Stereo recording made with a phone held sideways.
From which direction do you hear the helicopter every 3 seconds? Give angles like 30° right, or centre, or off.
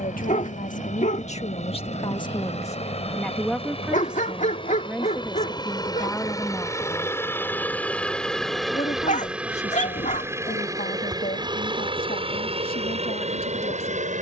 50° left, 30° left, 10° left, 20° right, 40° right.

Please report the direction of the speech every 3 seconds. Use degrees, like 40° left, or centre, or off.
40° left, centre, 20° left, 50° left, 70° left.